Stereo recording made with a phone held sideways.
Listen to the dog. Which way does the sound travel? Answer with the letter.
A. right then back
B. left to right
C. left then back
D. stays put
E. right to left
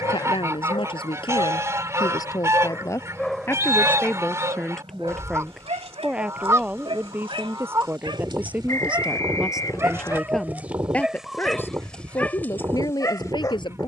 A.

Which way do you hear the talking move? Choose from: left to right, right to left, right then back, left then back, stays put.
right then back.